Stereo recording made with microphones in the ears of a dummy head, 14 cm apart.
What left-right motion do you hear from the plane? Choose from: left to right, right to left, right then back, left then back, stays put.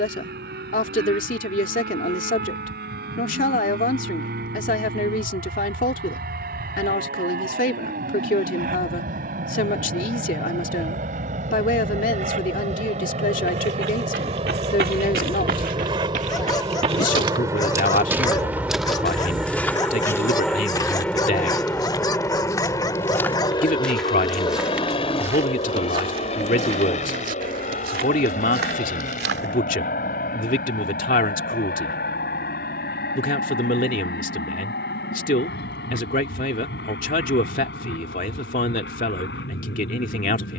right to left.